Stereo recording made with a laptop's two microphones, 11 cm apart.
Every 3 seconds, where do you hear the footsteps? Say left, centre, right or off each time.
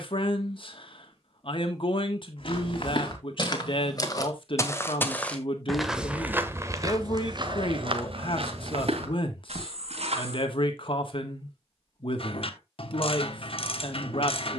left, left, right, right, off.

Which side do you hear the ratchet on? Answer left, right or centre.
left.